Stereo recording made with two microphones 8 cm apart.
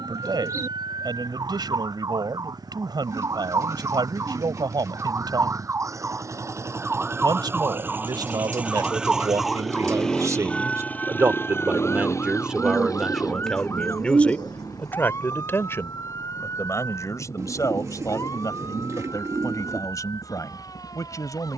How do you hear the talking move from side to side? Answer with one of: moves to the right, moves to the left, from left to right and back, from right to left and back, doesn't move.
moves to the left.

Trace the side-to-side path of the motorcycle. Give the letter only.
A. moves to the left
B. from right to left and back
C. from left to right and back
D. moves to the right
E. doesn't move
A.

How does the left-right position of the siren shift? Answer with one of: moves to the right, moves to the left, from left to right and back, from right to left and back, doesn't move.
moves to the left.